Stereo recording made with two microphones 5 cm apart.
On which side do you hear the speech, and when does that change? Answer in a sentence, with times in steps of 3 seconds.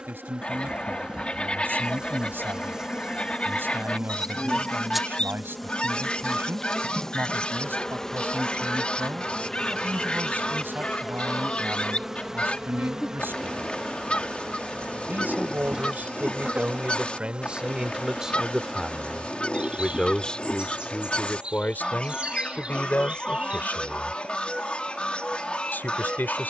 You can hear the speech on the right from 0 s, in the centre from 18 s and on the left from 21 s.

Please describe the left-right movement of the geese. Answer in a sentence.
You can hear the geese stay put.